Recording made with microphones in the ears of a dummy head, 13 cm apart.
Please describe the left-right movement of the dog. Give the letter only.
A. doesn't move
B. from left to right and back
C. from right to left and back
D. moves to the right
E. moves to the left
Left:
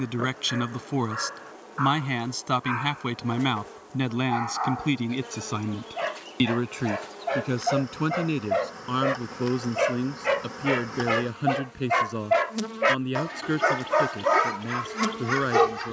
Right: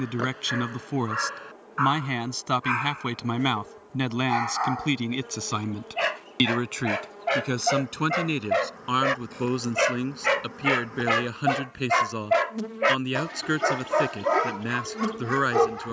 E.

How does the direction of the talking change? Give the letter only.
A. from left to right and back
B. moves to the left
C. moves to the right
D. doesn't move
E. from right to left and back
C.